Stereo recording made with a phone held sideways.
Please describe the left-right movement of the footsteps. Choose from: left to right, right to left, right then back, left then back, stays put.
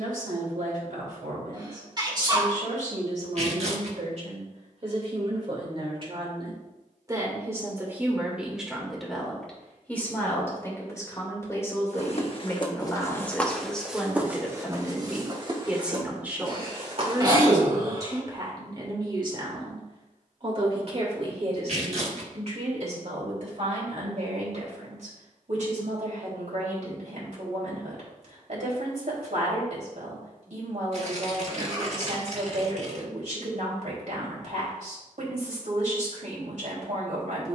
left to right.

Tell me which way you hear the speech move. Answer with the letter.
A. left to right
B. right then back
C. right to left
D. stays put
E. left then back
E.